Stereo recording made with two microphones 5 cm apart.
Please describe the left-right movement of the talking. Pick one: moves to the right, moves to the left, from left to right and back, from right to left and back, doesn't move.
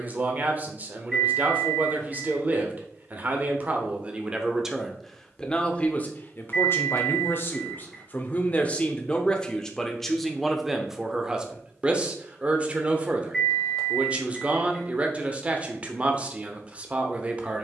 from right to left and back.